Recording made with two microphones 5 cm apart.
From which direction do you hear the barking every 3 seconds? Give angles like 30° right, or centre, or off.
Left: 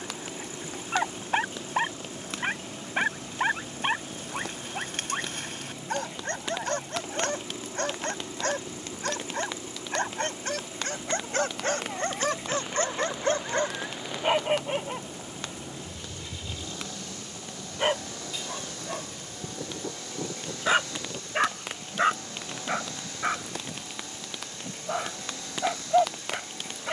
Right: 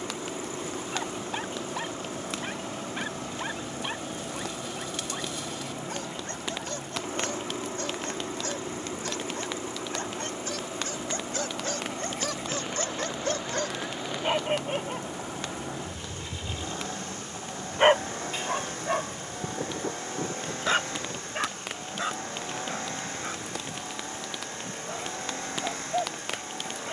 50° left, 50° left, 50° left, 50° left, 30° left, 30° right, 30° right, 40° left, 50° left.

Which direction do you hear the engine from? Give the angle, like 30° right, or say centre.
40° right.